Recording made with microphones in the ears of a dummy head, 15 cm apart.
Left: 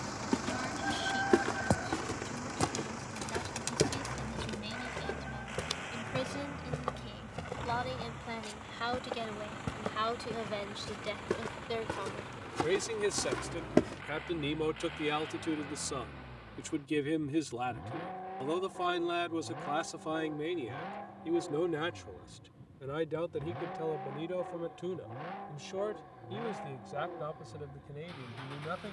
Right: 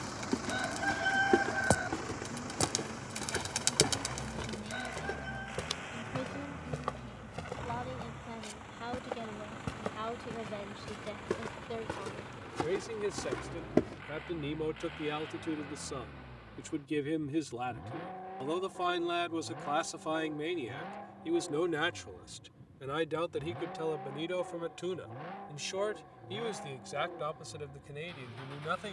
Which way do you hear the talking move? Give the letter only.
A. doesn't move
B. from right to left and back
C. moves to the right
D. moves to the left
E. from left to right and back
C.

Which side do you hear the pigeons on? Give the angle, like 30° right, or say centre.
30° right.